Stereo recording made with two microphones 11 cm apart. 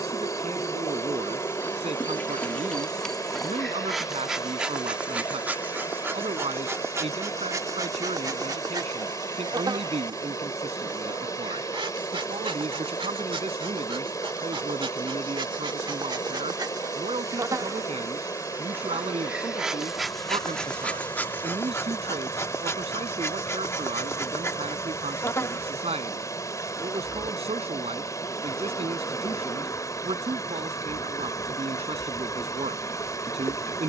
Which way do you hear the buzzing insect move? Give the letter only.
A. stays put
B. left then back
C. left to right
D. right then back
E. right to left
D.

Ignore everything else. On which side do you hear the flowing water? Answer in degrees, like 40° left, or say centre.
30° left.